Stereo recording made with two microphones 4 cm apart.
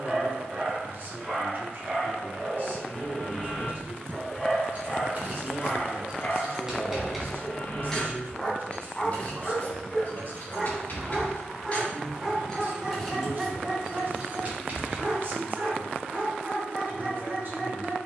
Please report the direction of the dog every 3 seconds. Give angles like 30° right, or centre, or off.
20° right, 10° left, 30° left, centre, 20° right, 30° right.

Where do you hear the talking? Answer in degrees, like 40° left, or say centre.
50° right.